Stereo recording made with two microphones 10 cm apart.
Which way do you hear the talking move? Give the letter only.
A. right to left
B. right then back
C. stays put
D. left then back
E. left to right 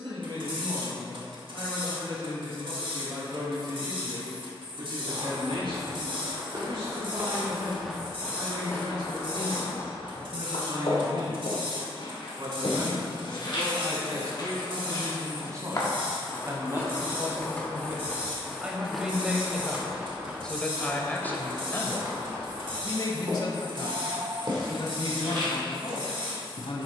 A.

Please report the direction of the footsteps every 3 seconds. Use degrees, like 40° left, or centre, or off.
off, 50° right, 10° right, 60° left, 60° left, 30° left, 10° right, 40° right, 50° right.